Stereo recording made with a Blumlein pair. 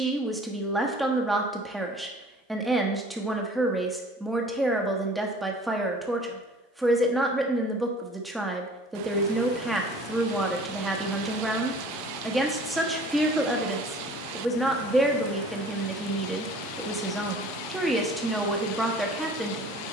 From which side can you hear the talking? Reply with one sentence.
In this clip you hear the talking in the centre.